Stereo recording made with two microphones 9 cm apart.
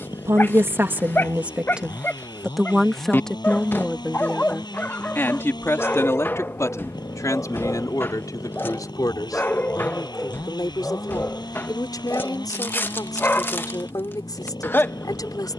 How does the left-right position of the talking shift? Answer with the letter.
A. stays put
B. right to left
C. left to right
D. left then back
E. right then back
B.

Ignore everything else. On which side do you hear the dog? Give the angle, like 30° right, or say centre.
20° left.